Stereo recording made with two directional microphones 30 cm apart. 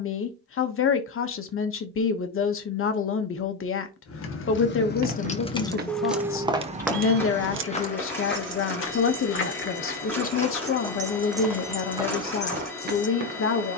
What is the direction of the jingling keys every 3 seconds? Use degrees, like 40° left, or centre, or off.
off, 30° left, 40° right, 30° right, 30° left.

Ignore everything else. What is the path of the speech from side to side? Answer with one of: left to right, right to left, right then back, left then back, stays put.
stays put.